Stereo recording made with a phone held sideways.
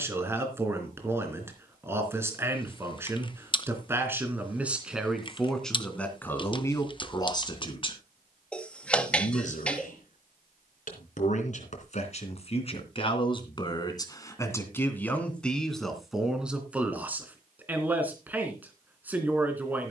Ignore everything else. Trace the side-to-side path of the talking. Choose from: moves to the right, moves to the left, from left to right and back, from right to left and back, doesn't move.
from right to left and back.